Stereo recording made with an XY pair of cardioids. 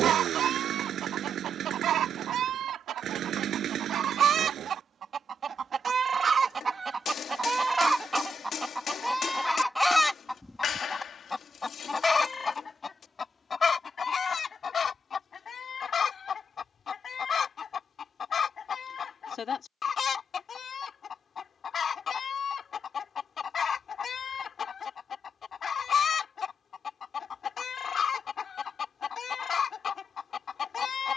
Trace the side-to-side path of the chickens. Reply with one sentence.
In this clip you hear the chickens travel towards the left.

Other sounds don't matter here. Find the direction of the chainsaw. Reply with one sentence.
In this clip you hear the chainsaw on the right.